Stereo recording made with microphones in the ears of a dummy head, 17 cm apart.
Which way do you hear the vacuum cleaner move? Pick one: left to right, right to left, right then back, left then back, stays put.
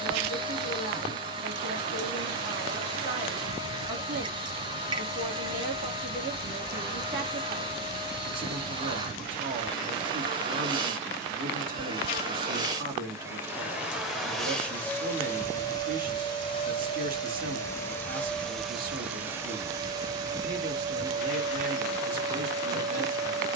left then back.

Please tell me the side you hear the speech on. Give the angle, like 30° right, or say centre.
50° right.